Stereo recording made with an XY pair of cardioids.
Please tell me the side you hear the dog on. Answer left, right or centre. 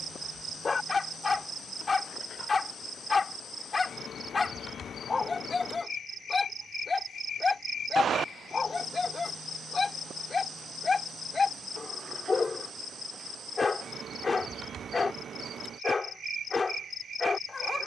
left.